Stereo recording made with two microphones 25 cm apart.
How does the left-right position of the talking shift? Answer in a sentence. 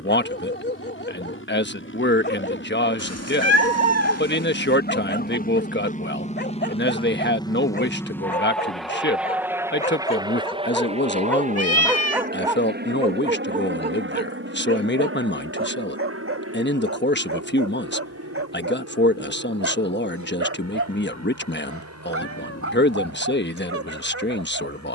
You can hear the talking stay in one place.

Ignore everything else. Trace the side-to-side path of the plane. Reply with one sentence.
You can hear the plane travel towards the right.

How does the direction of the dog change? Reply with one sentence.
You can hear the dog travel towards the right.